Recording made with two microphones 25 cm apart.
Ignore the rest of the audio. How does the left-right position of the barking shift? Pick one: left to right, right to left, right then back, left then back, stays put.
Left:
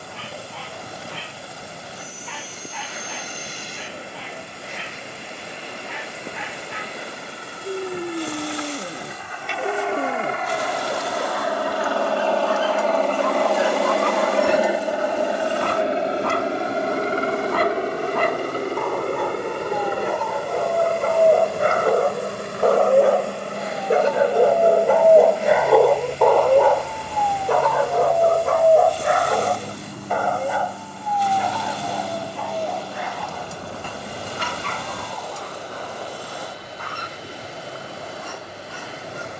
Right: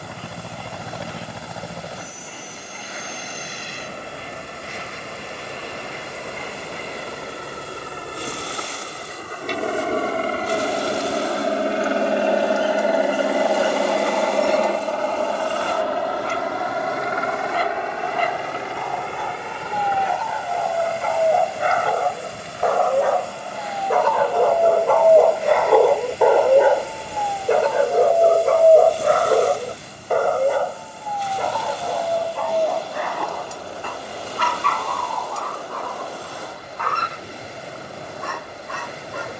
left to right.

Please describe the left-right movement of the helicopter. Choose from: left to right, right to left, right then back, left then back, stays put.
right to left.